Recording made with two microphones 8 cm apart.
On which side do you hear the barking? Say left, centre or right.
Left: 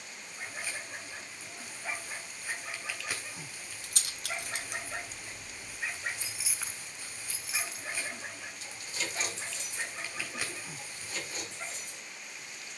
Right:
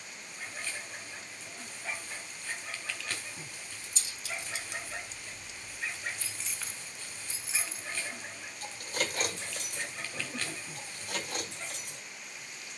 centre.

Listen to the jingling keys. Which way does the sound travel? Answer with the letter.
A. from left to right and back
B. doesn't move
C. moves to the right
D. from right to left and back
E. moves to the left
C.